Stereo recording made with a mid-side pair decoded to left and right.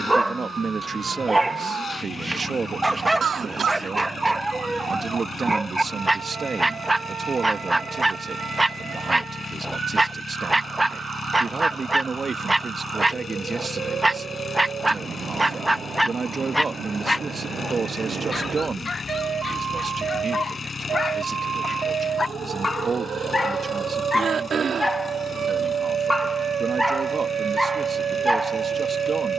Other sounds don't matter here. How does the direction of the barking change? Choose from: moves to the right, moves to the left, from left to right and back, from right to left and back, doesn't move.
from right to left and back.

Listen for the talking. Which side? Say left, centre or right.
right.